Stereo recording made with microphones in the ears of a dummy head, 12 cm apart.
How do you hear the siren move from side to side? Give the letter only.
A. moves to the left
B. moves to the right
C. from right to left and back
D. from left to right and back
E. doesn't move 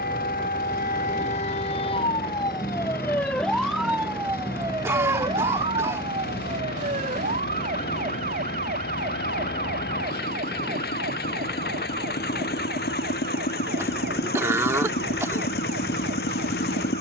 B.